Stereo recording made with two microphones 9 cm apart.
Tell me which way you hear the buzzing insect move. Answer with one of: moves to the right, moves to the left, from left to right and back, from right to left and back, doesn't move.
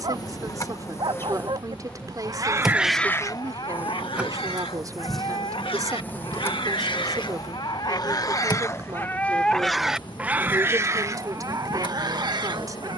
from left to right and back.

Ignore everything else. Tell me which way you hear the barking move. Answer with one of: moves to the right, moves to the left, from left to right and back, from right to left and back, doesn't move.
from right to left and back.